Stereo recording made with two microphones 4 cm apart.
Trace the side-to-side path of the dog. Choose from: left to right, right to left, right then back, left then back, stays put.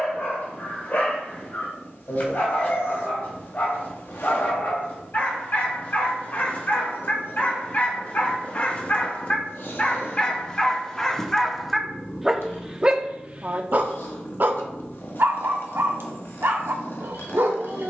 left to right.